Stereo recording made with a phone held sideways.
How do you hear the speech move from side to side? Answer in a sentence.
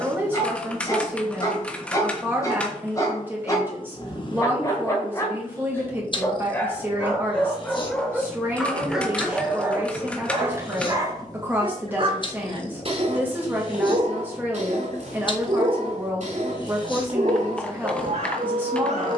In this clip you hear the speech stay in one place.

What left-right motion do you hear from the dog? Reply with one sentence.
In this clip you hear the dog go from the left side to the right.